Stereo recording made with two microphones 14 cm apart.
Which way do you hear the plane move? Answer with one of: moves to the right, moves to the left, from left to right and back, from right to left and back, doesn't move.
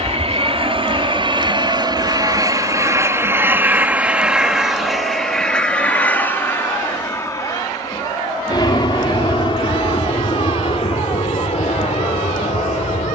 moves to the left.